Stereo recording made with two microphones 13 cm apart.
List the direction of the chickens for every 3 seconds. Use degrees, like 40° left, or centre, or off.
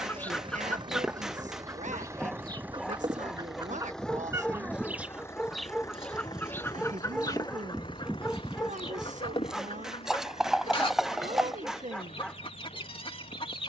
10° right, 20° right, 30° left, 40° left, 40° left.